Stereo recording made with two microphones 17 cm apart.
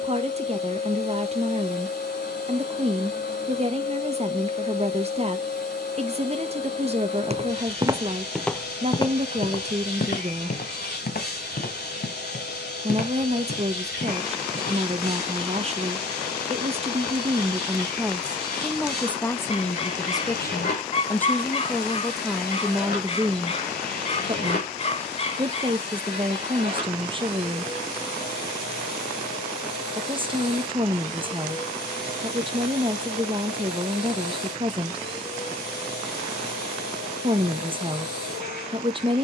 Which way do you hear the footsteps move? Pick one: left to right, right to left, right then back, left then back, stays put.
right to left.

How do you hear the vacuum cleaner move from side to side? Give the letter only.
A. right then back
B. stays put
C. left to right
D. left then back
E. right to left
B.